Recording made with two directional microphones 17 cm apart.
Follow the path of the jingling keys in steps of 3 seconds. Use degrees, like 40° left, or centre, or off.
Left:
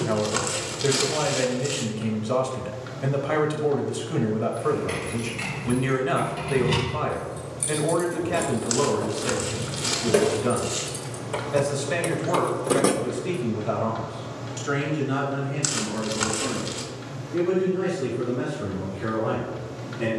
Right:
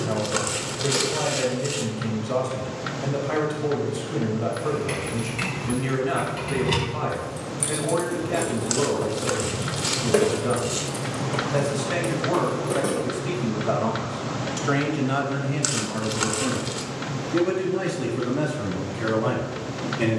off, 20° right, 20° right, centre, 40° left, off, off.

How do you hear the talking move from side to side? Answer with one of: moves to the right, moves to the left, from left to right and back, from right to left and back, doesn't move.
moves to the right.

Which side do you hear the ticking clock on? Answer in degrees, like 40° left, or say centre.
50° right.